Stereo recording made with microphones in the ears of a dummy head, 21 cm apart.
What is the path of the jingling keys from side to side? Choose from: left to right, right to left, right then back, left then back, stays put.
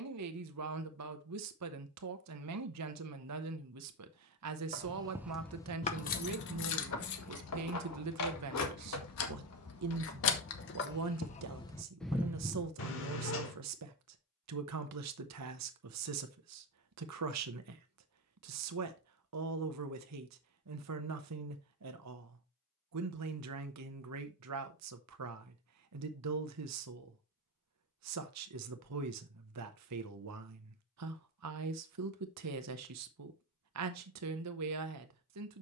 left then back.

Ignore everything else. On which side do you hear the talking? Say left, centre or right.
right.